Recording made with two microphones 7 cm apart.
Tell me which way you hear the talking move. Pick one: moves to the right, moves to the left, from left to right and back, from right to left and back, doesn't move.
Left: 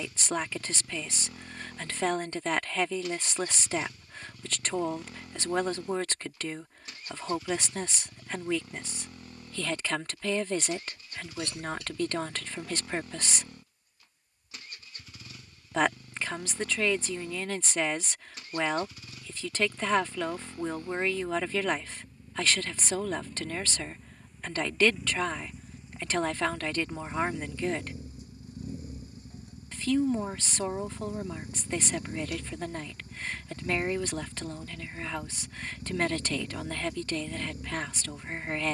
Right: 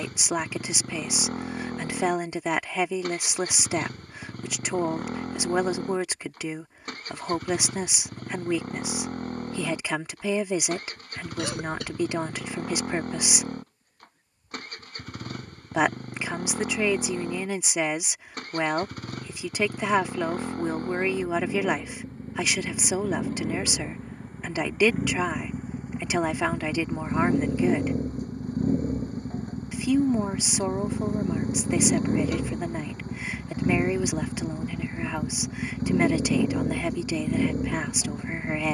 doesn't move.